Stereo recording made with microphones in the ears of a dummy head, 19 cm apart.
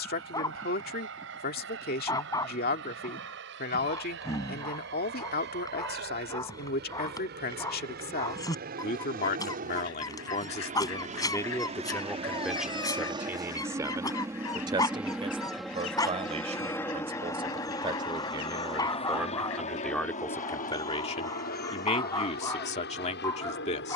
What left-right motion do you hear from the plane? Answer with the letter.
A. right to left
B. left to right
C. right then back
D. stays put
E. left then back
A.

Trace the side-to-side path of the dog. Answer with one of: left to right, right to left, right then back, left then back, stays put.
stays put.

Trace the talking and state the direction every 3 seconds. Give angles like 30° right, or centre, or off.
50° left, 50° left, 50° left, 30° left, 10° right, 30° right, centre, 30° left.